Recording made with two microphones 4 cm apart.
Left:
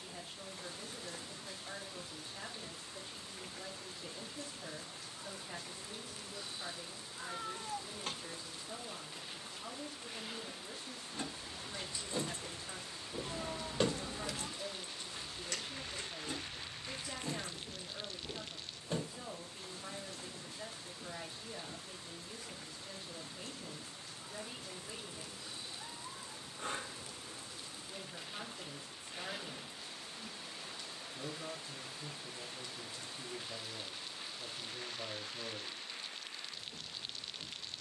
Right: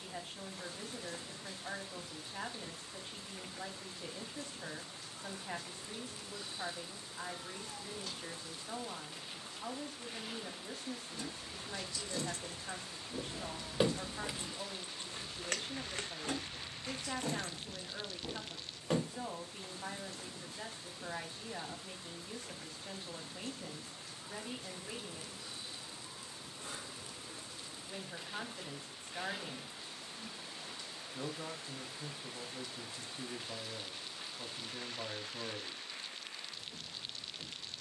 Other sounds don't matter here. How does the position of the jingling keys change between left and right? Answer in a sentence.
You can hear the jingling keys go from the left side to the right.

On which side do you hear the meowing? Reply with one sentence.
In this clip you hear the meowing on the left.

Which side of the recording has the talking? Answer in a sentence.
In this clip you hear the talking on the right.